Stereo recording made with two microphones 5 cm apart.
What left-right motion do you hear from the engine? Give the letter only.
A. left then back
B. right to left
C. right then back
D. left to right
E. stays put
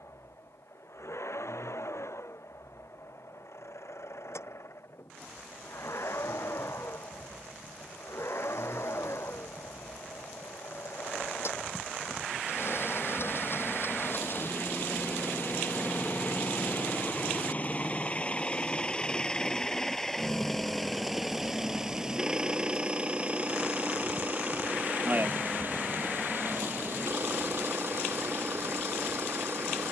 D.